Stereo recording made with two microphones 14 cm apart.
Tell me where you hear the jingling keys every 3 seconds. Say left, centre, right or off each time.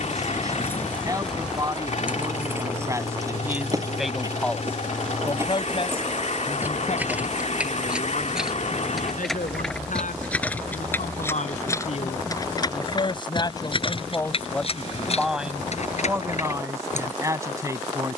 centre, right, centre, centre, left, left.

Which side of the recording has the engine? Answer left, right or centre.
left.